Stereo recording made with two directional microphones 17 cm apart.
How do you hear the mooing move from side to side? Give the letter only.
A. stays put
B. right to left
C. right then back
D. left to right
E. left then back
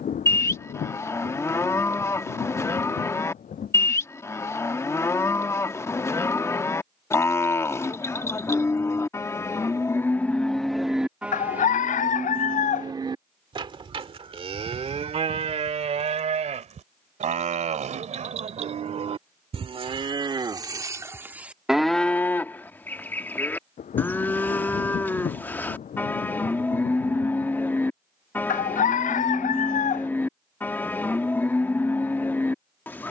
C.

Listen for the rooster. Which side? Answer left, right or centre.
left.